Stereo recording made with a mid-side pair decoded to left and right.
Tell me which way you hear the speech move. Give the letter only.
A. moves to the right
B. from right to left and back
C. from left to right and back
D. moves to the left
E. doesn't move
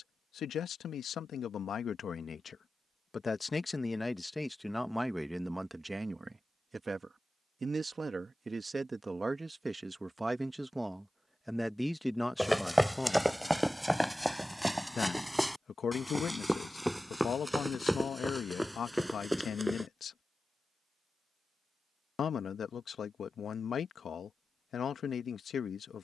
C.